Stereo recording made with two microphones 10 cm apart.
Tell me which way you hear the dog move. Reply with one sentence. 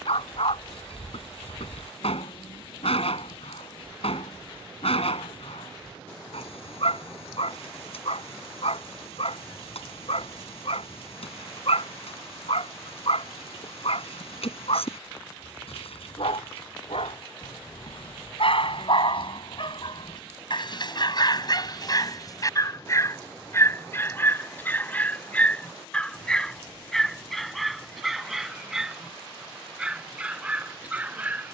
In this clip you hear the dog move from left to right.